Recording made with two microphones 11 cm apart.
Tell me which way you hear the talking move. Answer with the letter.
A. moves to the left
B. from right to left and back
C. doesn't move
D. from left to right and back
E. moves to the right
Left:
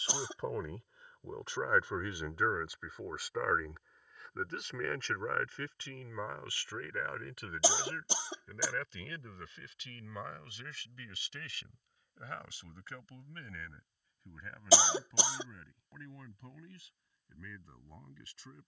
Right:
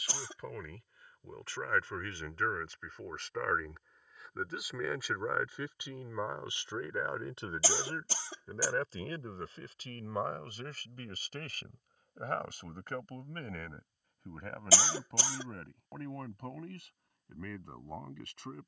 E.